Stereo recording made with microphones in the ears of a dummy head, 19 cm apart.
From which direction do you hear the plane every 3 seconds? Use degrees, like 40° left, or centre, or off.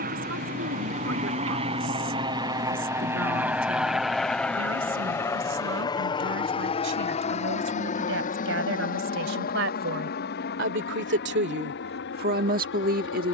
30° right, centre, 30° left, 50° left, 50° left.